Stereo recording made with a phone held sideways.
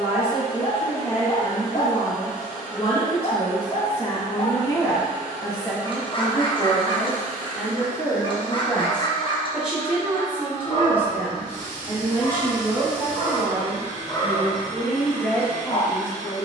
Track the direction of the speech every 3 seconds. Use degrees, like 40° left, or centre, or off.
40° left, 30° left, 10° left, 10° right, 10° right, 30° left.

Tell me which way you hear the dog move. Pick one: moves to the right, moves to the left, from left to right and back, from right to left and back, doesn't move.
doesn't move.